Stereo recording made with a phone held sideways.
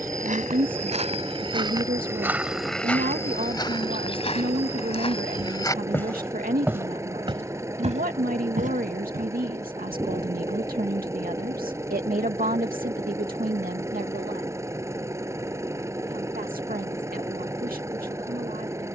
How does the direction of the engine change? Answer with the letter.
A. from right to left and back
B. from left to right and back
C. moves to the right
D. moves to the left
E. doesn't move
E.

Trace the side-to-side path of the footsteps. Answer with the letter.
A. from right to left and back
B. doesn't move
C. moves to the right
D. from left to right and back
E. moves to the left
A.